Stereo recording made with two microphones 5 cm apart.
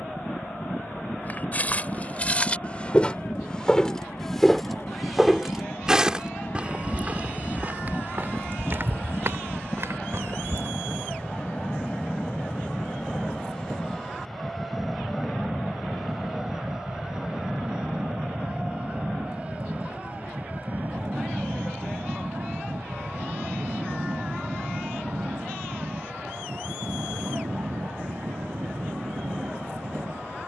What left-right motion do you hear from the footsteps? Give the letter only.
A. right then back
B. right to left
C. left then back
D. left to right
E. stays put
D.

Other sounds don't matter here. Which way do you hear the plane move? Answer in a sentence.
You can hear the plane go from the left side to the right.